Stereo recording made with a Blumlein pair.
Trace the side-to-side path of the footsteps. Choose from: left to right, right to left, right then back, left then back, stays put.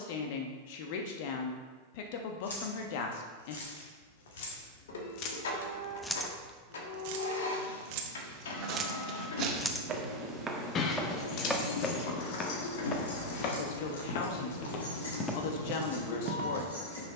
left then back.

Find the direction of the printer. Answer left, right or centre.
left.